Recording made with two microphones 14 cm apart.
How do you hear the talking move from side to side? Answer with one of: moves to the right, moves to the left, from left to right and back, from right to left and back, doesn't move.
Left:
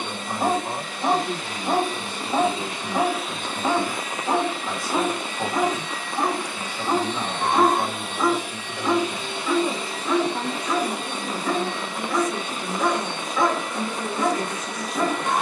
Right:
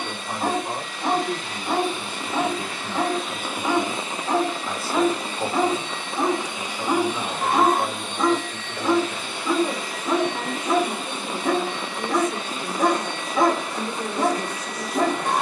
doesn't move.